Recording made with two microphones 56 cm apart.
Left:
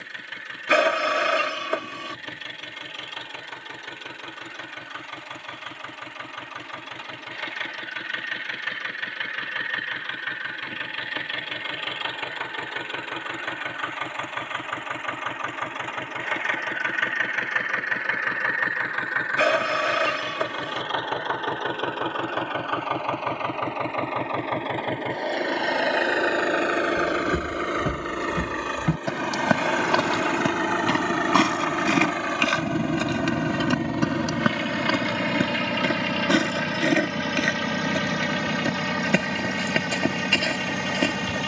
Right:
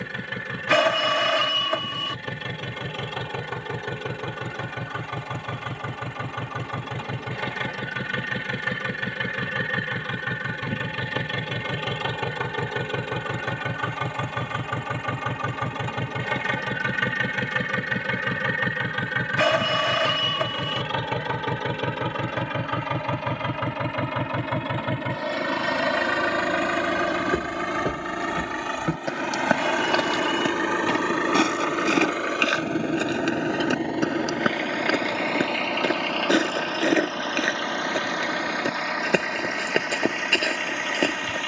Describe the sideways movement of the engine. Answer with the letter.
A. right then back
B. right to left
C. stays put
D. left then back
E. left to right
B.